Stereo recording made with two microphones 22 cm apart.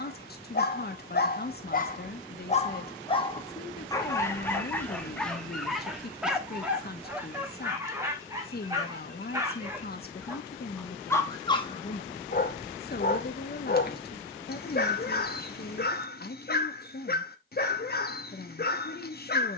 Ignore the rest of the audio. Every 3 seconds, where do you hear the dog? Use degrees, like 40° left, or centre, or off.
40° left, 10° left, 10° right, centre, 40° left, 40° left, 40° left.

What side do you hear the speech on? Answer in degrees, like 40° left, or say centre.
40° left.